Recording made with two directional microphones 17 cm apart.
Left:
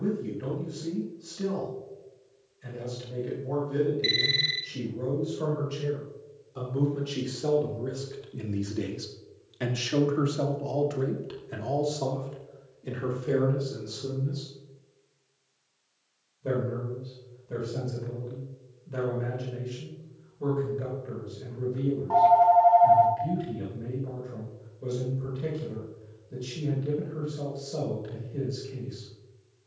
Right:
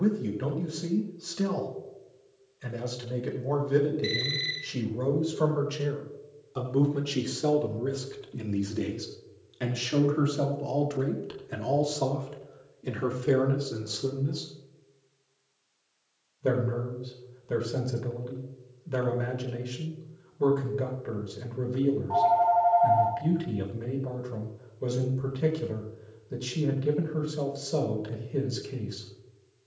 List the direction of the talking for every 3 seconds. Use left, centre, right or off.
right, right, right, centre, right, right, right, right, right, right.